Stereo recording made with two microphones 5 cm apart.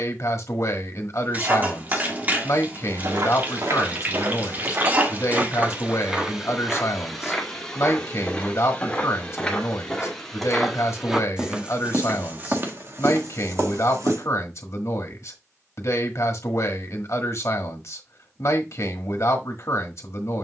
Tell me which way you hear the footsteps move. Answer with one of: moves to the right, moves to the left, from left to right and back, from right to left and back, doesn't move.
from right to left and back.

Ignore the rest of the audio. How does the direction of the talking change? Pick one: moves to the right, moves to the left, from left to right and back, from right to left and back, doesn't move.
doesn't move.